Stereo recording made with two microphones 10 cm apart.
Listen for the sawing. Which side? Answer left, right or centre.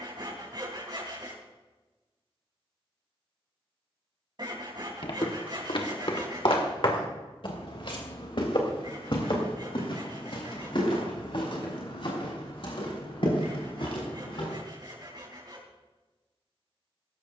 right.